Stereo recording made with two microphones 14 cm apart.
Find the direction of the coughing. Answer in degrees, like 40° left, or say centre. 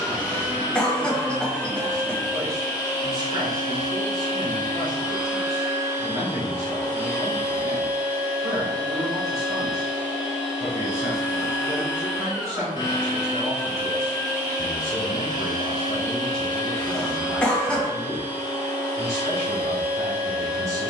10° left.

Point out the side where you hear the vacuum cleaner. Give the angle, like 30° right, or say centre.
30° left.